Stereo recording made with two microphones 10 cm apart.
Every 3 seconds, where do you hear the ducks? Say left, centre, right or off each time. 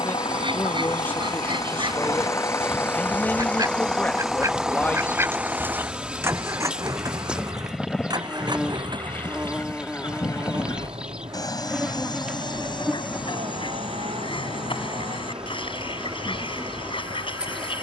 right, right, centre, left, left, left.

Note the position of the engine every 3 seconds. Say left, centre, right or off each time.
left, centre, right, right, right, right.